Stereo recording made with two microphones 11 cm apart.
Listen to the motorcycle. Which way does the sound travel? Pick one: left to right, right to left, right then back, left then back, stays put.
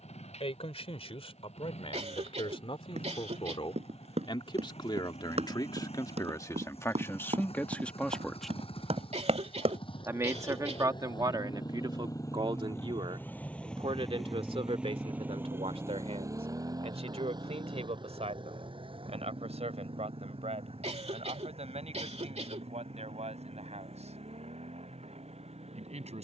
left to right.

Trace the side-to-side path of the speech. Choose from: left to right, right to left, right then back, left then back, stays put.
left to right.